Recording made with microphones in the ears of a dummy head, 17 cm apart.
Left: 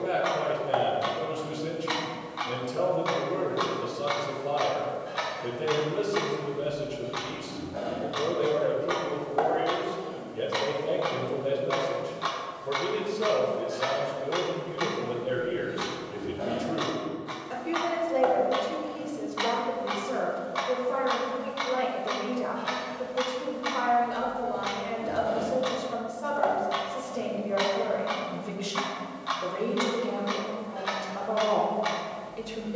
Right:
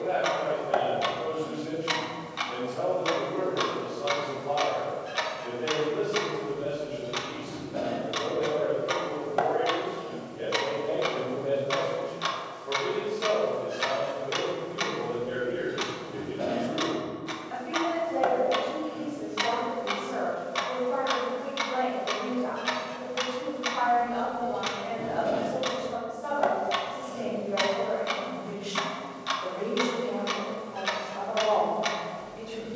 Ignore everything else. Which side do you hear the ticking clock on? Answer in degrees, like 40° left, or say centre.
30° right.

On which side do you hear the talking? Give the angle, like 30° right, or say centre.
60° left.